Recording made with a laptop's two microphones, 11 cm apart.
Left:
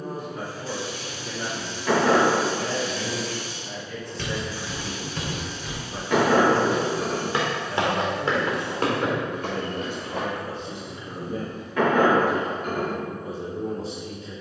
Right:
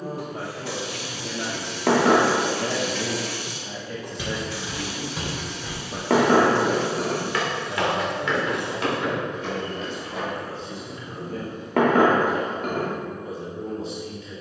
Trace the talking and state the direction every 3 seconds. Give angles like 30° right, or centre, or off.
80° right, 60° right, 10° right, 20° left, 40° left.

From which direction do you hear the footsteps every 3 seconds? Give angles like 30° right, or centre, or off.
off, 10° right, 30° left, 50° left, off.